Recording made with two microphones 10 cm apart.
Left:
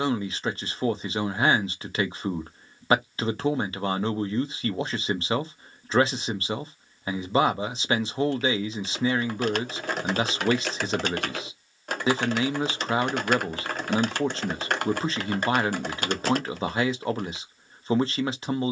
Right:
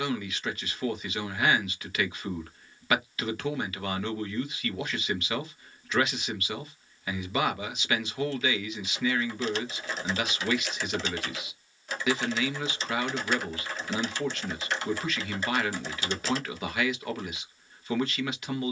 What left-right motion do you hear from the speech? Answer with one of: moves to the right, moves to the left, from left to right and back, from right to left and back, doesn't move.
doesn't move.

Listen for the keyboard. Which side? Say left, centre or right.
left.